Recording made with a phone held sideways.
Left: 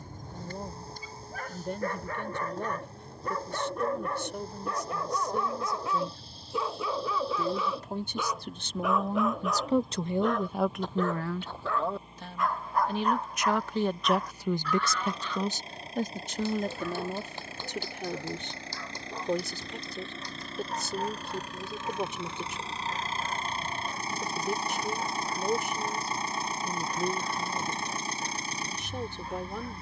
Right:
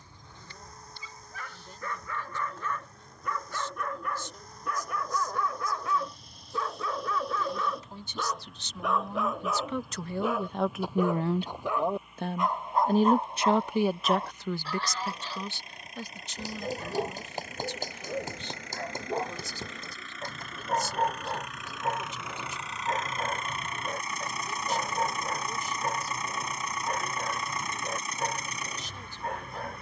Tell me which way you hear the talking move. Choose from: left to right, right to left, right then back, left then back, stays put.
right then back.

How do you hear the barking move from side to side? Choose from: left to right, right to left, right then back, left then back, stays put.
left to right.